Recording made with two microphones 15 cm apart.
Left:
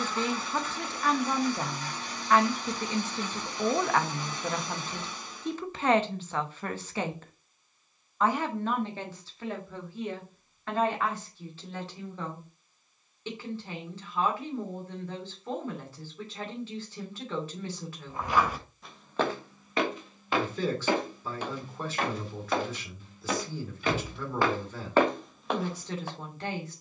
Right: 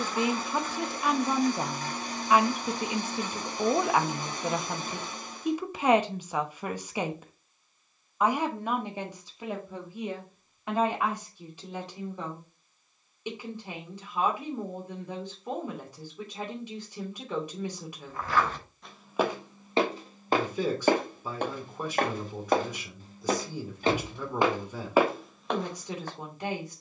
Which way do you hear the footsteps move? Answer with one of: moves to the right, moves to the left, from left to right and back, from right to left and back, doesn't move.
from left to right and back.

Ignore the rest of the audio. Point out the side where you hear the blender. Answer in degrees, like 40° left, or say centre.
50° right.